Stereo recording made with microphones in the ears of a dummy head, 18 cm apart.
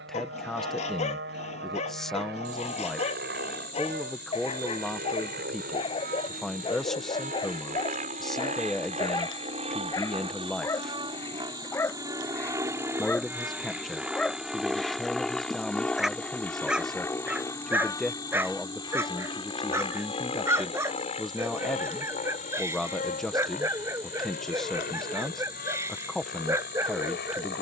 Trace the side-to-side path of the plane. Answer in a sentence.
You can hear the plane move from right to left.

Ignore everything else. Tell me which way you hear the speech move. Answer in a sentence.
You can hear the speech stay put.